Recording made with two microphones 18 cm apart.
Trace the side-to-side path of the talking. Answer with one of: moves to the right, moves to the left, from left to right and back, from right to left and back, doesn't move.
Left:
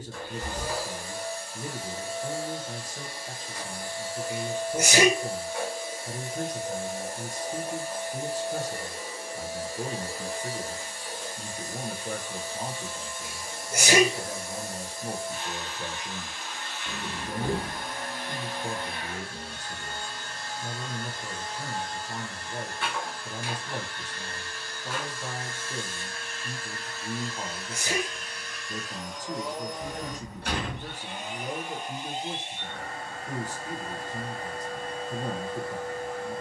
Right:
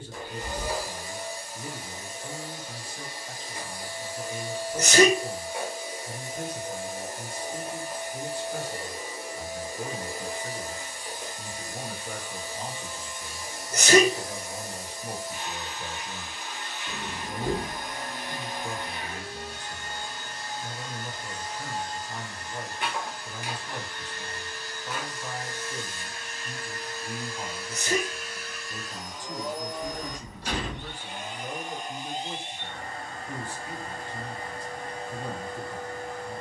doesn't move.